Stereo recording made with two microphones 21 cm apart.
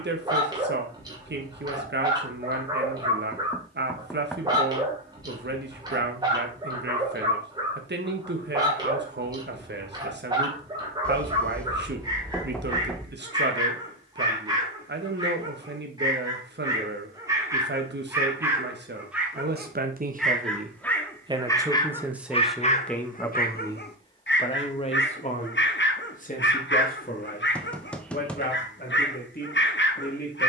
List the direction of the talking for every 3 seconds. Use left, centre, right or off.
right, right, right, right, right, right, right, centre, left, left.